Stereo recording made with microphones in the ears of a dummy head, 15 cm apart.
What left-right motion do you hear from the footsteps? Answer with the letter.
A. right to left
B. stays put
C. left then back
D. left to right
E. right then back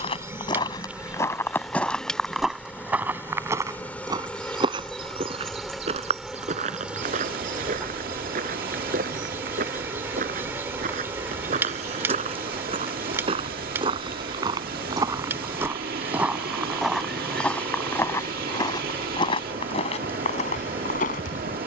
E.